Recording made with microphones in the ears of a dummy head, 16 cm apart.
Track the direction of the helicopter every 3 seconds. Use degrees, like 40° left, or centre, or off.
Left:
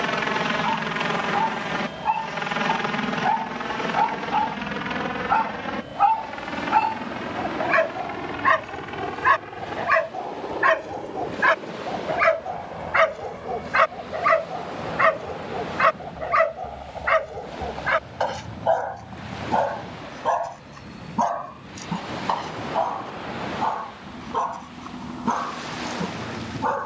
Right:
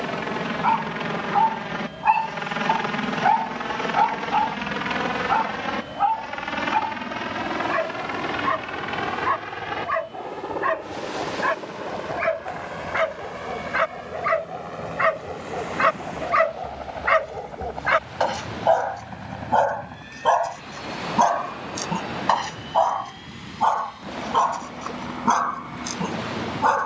20° left, 10° right, 30° right, 40° right, 50° right, 50° right, 60° right, 60° right, 60° right.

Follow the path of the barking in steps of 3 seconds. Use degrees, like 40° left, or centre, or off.
40° right, 10° right, 40° left, 50° left, 30° left, centre, 30° right, 40° right, 50° right.